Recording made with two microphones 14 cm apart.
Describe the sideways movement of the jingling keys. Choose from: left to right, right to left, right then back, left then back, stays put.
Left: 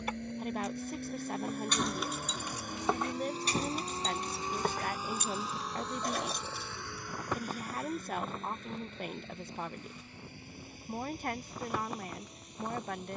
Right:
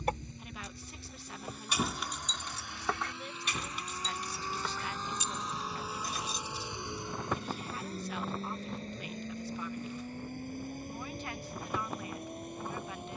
right to left.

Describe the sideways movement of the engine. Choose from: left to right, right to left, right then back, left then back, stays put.
left to right.